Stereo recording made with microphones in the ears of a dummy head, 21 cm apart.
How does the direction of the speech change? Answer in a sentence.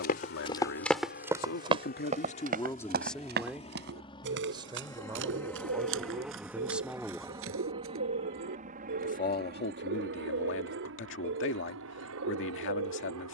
You can hear the speech go right and come back.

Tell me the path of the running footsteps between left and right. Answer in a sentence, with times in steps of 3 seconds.
You can hear the running footsteps in the centre from 0 s, on the right from 3 s and not at all from 9 s.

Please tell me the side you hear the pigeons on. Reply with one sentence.
In this clip you hear the pigeons on the right.